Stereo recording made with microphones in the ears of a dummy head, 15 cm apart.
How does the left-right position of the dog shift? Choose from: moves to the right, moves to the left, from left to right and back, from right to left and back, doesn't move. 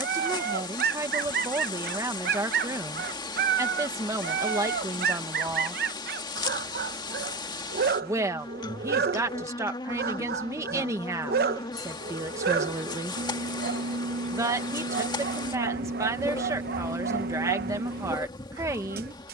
doesn't move.